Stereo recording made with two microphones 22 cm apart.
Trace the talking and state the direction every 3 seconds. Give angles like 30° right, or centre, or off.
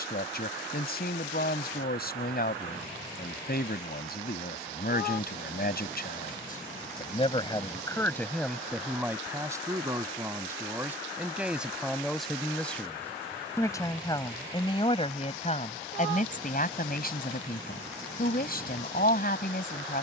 50° left, 50° left, 20° left, 10° right, 10° left, 40° left, 40° left.